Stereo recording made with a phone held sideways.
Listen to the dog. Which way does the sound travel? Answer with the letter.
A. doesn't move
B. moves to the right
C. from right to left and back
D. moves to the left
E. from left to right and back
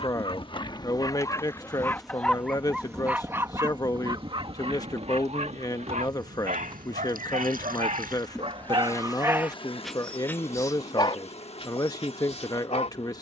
E.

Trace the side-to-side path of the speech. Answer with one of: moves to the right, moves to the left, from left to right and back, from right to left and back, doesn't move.
doesn't move.